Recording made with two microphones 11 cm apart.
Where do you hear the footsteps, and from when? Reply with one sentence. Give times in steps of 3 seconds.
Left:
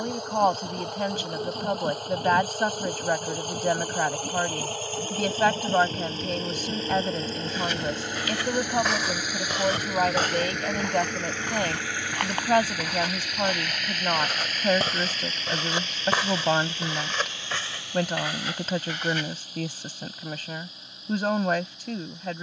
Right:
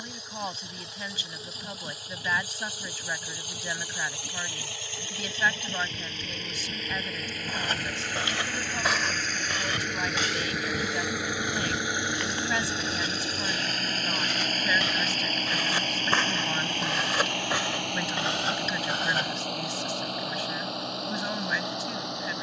You can hear the footsteps not at all from 0 s, on the right from 6 s, on the left from 9 s, in the centre from 15 s, on the right from 18 s and not at all from 21 s.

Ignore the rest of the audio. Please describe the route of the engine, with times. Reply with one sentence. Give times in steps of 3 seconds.
You can hear the engine on the left from 0 s, in the centre from 9 s and on the right from 12 s.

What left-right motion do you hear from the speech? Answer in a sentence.
In this clip you hear the speech stay put.